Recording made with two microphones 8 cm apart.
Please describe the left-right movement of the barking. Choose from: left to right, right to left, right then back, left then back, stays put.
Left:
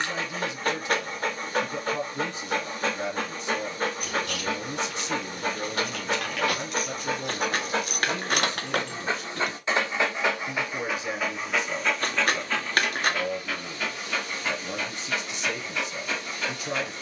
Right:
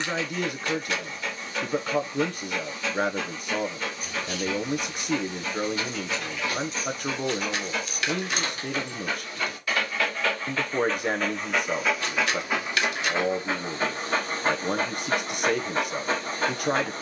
left to right.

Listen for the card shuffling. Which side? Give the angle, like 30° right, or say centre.
50° left.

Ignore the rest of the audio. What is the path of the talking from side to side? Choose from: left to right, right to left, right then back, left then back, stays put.
stays put.